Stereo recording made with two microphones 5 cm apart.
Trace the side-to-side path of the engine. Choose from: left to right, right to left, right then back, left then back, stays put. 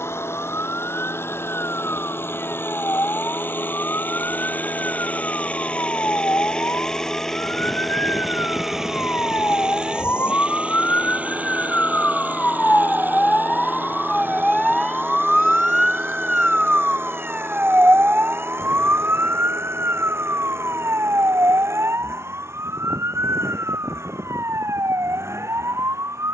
left to right.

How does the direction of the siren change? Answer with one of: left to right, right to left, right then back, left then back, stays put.
left to right.